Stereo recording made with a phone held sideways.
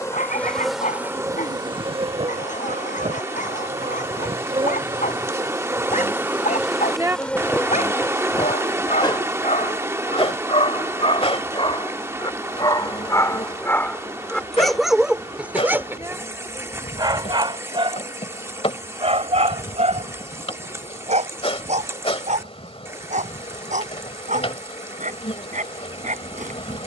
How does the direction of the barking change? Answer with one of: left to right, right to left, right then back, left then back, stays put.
left to right.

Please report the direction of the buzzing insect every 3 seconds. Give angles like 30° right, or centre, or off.
30° right, 40° right, 10° left, 40° left, 50° left, 50° left, 50° left, 50° left, 50° left.